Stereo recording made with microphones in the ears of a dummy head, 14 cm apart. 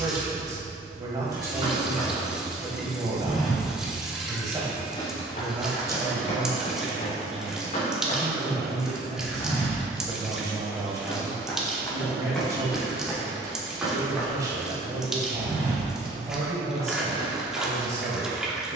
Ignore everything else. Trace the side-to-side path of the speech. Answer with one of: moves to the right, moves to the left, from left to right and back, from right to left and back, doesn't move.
doesn't move.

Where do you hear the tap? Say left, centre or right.
centre.